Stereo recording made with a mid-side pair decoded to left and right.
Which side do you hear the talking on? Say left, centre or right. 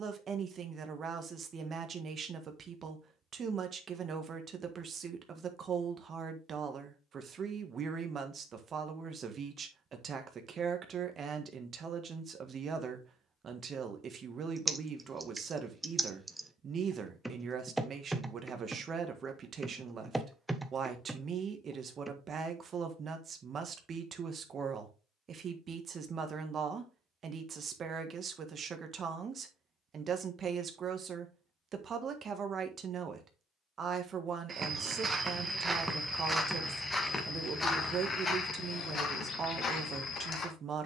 right.